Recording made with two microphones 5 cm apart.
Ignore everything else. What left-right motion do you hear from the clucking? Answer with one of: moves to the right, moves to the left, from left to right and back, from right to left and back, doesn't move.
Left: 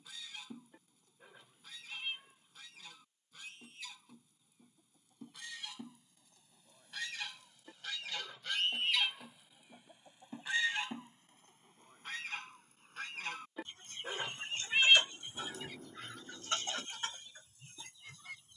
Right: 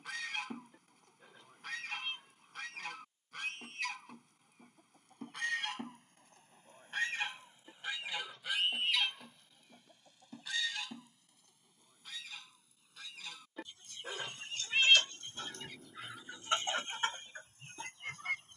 from right to left and back.